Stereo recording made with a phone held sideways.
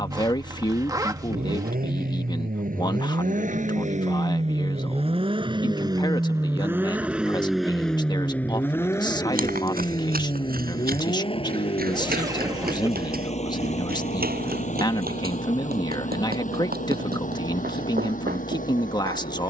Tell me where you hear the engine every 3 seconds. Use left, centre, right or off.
right, right, centre, left, left, left, left.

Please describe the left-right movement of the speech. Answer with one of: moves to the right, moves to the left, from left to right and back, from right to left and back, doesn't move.
doesn't move.